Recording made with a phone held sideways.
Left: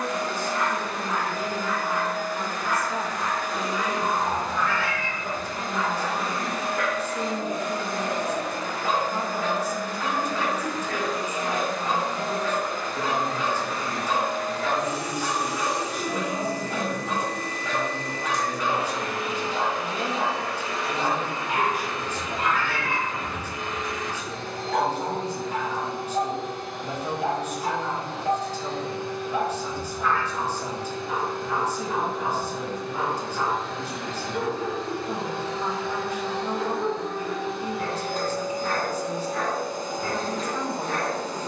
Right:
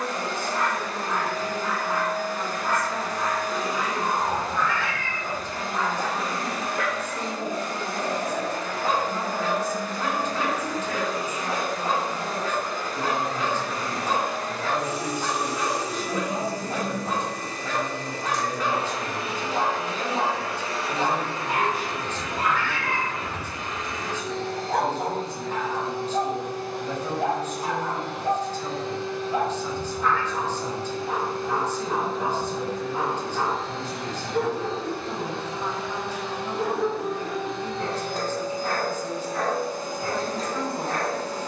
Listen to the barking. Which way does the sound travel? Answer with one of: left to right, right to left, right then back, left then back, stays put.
stays put.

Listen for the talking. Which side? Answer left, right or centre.
centre.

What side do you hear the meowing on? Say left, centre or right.
centre.